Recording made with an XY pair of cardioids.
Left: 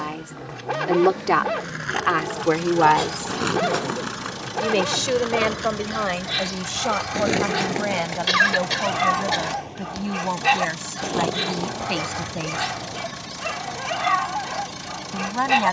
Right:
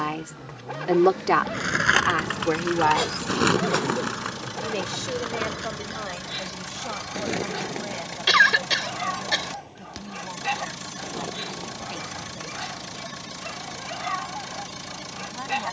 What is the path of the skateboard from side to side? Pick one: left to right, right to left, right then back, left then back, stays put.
right to left.